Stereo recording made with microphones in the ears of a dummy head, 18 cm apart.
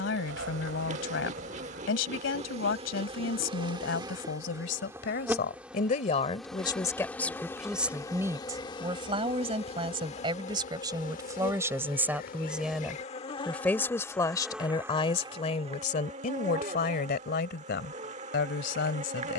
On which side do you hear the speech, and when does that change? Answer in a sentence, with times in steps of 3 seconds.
In this clip you hear the speech on the left from 0 s, in the centre from 6 s, on the right from 9 s, in the centre from 12 s and on the left from 15 s.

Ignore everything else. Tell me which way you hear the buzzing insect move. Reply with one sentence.
You can hear the buzzing insect go left and come back.